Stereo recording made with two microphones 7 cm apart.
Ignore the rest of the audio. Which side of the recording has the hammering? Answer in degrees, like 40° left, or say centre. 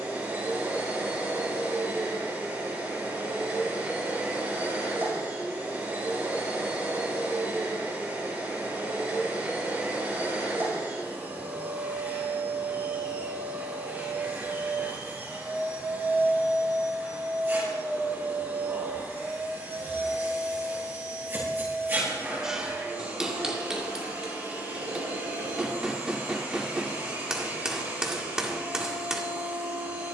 10° right.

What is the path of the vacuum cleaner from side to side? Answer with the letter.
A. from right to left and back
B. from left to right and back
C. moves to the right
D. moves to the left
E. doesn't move
E.